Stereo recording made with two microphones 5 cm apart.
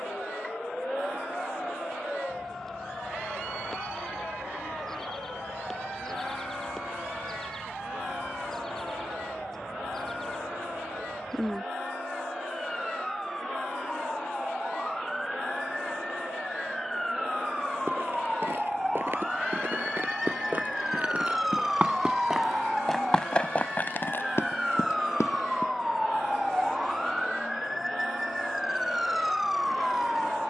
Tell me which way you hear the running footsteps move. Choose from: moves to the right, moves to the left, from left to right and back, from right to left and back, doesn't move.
moves to the left.